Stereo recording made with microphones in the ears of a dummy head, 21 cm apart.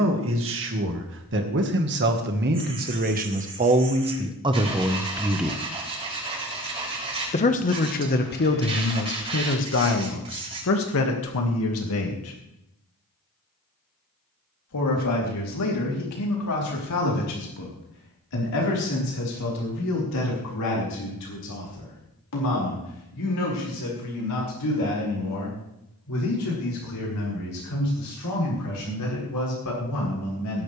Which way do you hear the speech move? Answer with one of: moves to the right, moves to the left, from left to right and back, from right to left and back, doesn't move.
moves to the left.